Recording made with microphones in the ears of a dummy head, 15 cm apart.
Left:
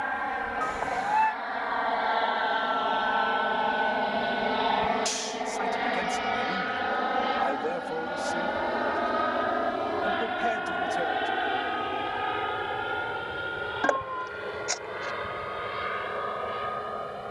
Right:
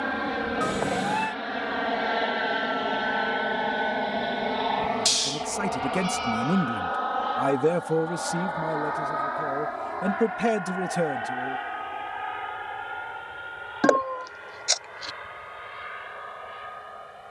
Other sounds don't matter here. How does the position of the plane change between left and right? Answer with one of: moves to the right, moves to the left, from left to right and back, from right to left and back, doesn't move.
moves to the left.